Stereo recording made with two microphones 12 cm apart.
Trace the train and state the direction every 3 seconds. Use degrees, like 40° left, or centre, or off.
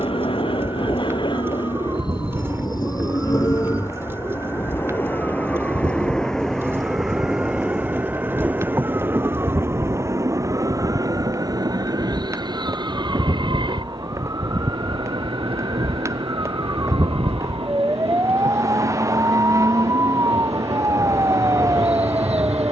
40° left, 20° left, centre, 30° right, 40° right, 50° right, 60° right, 60° right.